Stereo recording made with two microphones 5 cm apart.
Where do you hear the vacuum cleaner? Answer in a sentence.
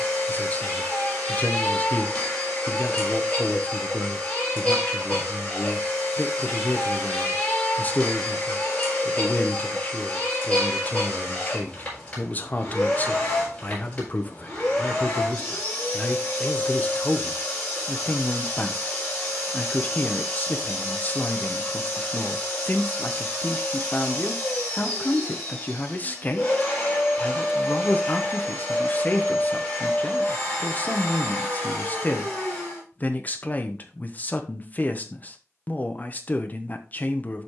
You can hear the vacuum cleaner on the left.